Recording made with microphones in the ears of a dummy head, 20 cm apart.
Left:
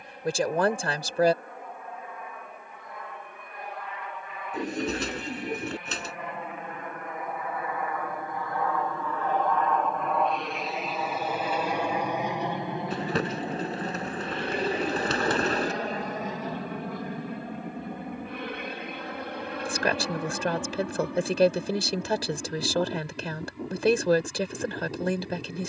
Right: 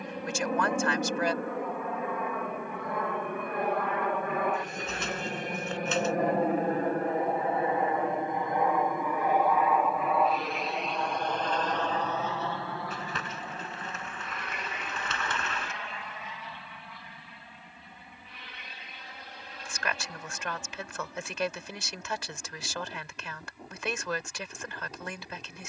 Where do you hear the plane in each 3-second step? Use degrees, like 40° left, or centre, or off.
60° right, 50° right, 30° right, centre, 20° left, 30° left, 40° left, 50° left, 50° left.